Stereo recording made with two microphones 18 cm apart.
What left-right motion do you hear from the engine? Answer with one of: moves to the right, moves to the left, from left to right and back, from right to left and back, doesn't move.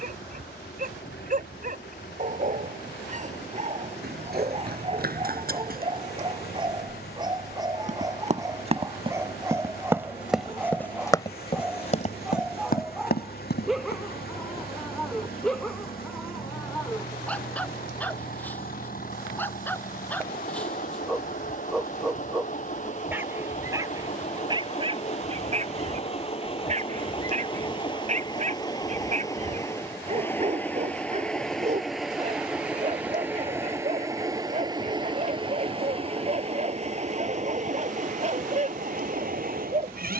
moves to the right.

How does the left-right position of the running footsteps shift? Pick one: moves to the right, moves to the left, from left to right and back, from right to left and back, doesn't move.
moves to the left.